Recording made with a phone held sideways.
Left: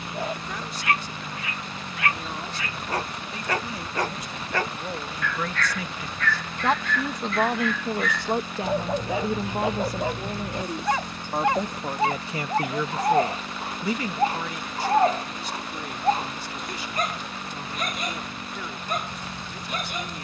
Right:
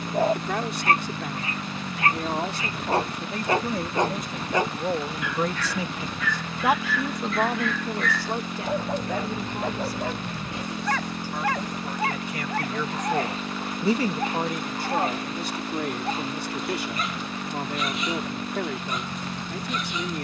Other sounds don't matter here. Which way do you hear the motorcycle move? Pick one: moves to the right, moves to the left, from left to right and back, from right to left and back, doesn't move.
doesn't move.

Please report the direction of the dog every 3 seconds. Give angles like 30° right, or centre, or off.
30° right, 20° right, centre, 20° left, 30° left, 40° left, 50° left.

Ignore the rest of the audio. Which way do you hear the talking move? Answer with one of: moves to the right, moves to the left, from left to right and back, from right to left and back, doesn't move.
from right to left and back.